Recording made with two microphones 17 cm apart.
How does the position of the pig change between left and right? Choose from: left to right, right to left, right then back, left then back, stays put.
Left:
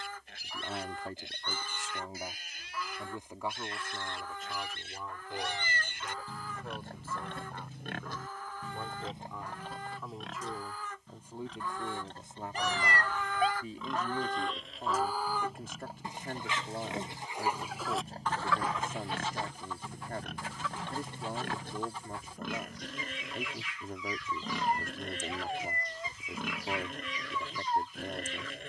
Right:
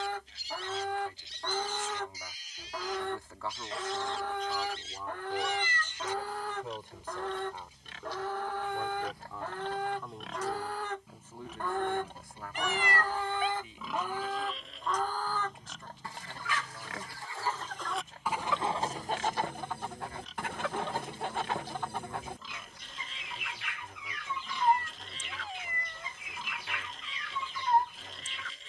right then back.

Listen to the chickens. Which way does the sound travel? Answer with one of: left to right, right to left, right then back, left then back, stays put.
left then back.